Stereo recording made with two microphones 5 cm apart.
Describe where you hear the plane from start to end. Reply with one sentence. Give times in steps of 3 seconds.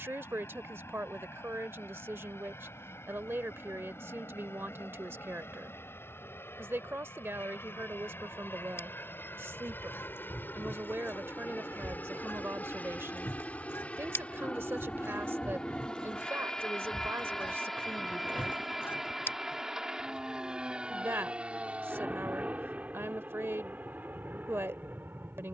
In this clip you hear the plane on the left from 0 s, in the centre from 15 s and on the right from 21 s.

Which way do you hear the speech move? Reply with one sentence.
You can hear the speech stay put.